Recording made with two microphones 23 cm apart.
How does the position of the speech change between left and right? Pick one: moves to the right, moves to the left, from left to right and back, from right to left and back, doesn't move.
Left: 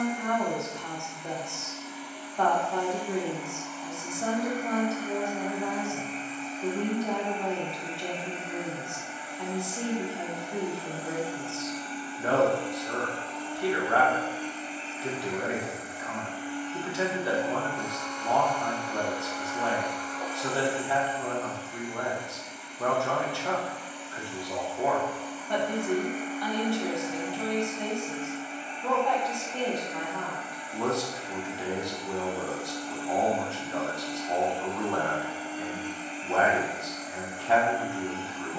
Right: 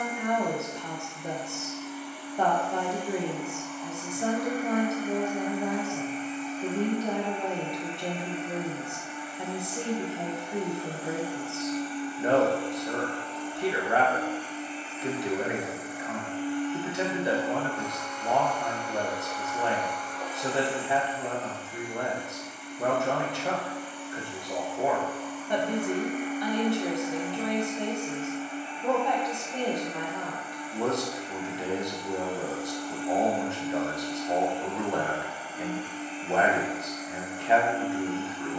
doesn't move.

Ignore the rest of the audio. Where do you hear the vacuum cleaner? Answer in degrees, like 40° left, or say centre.
10° right.